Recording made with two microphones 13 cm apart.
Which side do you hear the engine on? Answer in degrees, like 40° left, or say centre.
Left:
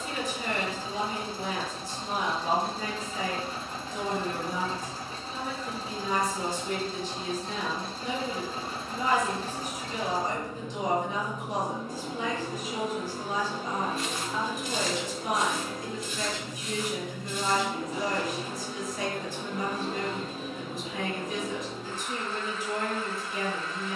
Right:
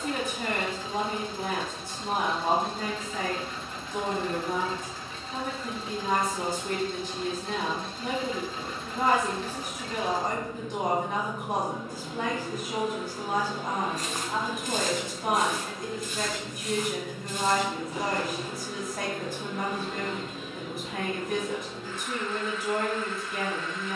40° left.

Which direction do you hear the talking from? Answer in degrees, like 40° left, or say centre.
60° right.